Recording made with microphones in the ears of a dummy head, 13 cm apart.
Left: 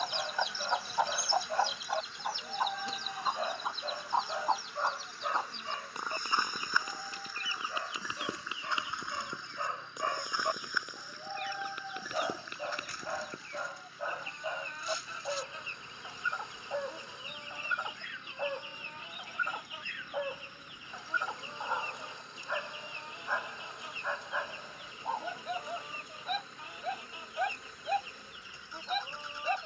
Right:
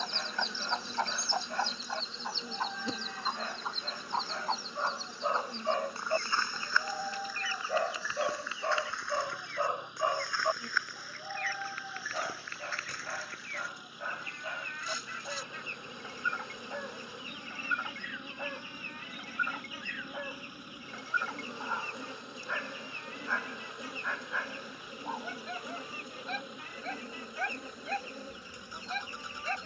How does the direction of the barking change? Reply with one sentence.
In this clip you hear the barking move from left to right and back again.